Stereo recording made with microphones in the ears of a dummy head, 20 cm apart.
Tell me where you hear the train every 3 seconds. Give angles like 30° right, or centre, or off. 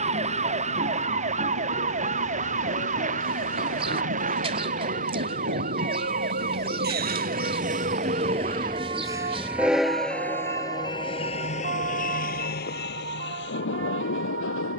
70° right, 60° right, 40° right, 10° left, 50° left.